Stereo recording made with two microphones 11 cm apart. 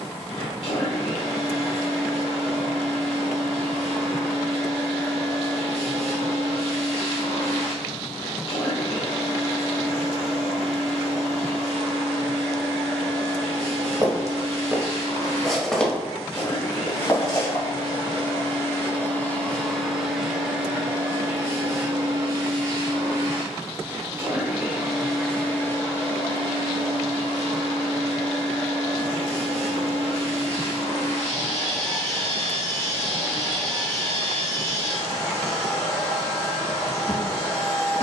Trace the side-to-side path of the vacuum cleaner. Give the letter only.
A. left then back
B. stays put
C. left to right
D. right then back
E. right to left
D.